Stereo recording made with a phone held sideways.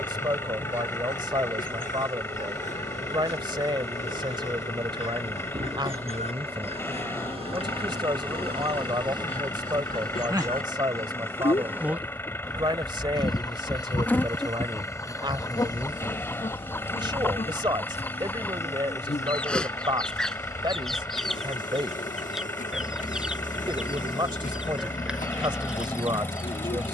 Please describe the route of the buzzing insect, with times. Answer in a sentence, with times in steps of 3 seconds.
You can hear the buzzing insect on the right from 0 s, in the centre from 12 s and on the left from 15 s.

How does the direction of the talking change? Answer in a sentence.
In this clip you hear the talking stay put.